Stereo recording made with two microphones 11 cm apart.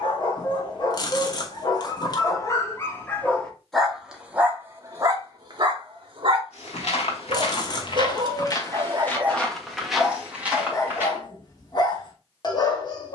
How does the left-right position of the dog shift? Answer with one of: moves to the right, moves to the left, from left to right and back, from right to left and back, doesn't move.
from left to right and back.